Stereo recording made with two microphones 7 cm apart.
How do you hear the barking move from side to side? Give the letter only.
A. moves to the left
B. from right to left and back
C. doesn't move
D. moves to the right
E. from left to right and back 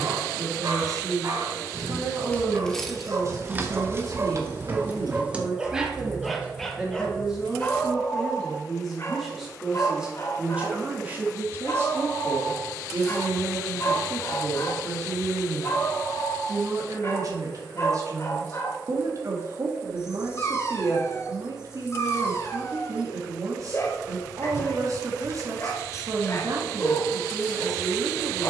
A.